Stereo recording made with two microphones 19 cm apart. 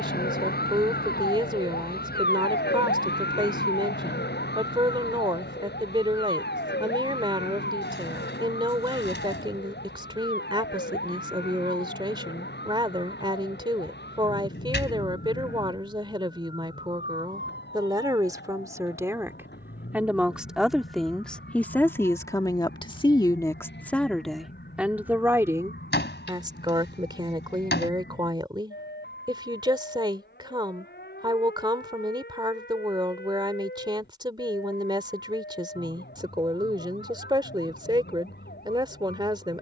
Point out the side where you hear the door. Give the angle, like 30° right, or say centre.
60° left.